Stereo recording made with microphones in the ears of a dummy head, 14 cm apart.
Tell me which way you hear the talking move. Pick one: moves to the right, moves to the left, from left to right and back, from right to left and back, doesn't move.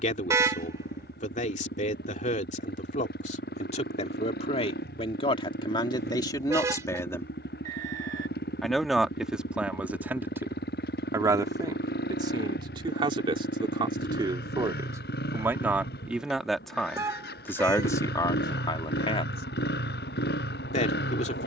from left to right and back.